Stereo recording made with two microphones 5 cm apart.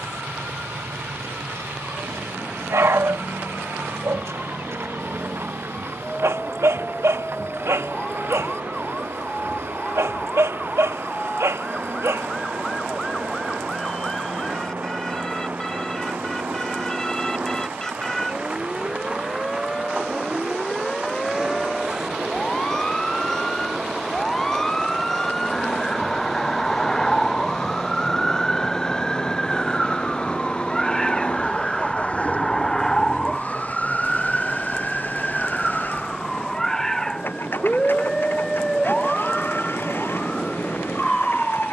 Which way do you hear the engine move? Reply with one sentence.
In this clip you hear the engine move from right to left.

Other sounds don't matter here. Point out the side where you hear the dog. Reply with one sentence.
In this clip you hear the dog on the right.